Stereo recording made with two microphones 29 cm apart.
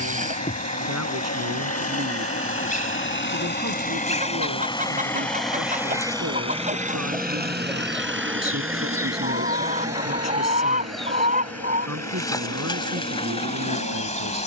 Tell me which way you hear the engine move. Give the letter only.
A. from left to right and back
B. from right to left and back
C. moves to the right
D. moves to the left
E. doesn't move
C.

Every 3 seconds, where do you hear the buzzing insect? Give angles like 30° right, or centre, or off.
30° left, 20° left, centre, centre, 20° left.